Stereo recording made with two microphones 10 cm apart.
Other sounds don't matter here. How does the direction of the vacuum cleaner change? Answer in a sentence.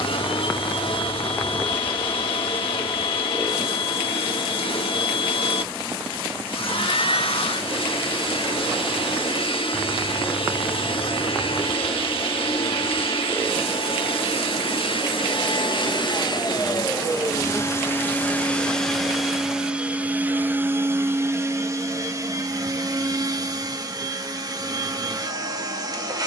In this clip you hear the vacuum cleaner move to the right.